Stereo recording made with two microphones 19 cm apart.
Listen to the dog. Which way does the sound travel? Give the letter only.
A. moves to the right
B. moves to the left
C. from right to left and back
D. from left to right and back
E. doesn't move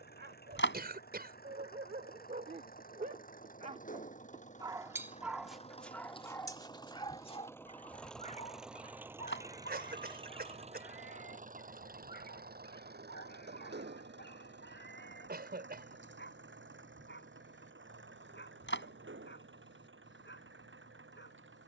B.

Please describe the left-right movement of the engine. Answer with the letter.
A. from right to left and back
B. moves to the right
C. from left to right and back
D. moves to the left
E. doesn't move
B.